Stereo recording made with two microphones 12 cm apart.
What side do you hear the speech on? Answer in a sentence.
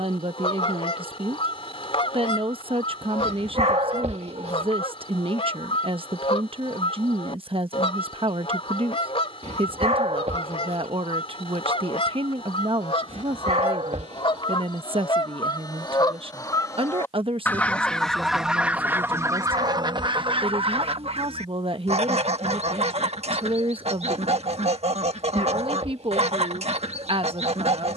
In this clip you hear the speech on the right.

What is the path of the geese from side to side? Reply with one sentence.
You can hear the geese travel towards the right.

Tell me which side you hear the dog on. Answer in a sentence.
In this clip you hear the dog on the right.